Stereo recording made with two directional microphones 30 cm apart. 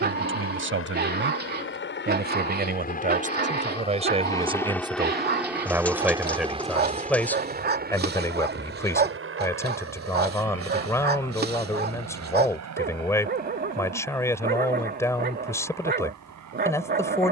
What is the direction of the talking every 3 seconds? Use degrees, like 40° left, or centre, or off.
40° right, 20° right, centre, 10° left, 10° left, 10° left.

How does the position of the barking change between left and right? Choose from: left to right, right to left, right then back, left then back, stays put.
stays put.